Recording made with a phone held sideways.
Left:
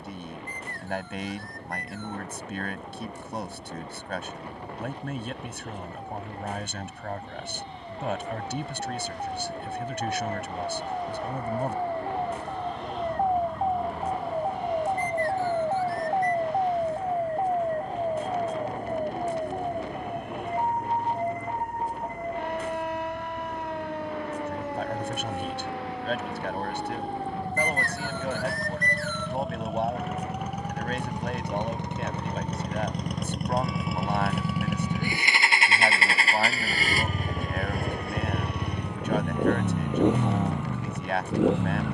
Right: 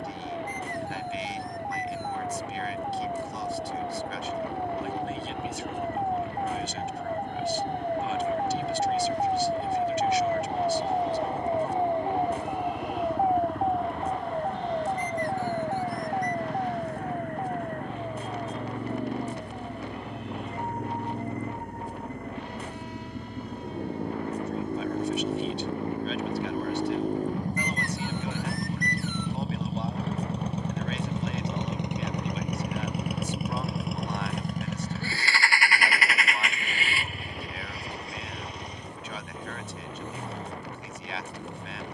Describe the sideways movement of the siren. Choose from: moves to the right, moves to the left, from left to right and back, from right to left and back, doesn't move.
moves to the left.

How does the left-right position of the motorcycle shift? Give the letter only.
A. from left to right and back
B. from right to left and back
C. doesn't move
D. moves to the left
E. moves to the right
D.